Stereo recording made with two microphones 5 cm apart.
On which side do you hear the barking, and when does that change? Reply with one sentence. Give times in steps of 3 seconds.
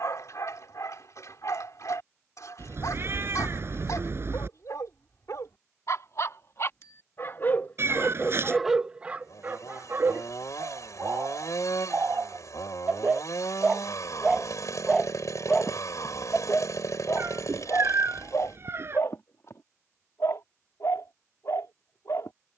You can hear the barking on the left from 0 s, on the right from 9 s and on the left from 15 s.